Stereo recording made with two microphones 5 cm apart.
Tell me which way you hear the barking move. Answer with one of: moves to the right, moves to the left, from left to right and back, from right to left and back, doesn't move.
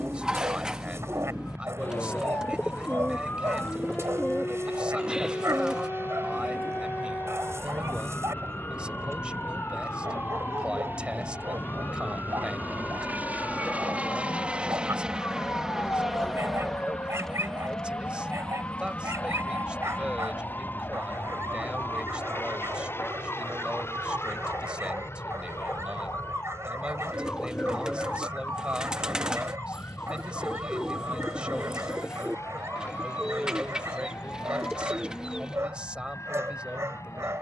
doesn't move.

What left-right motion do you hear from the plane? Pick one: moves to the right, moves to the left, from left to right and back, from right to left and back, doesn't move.
moves to the left.